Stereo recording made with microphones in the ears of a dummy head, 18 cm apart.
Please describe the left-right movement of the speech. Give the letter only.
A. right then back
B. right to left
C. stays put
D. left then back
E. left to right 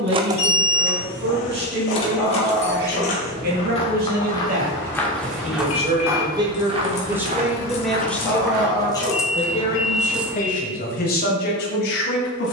B.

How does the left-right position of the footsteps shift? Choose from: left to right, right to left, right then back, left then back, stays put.
left to right.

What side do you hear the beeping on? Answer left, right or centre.
left.